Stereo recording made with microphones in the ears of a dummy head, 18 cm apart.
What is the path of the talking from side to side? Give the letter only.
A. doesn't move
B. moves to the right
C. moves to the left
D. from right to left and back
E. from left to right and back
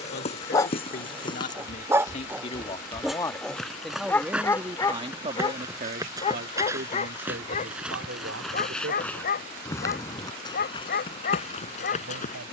B.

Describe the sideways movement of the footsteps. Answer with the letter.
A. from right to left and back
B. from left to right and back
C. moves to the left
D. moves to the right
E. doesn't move
B.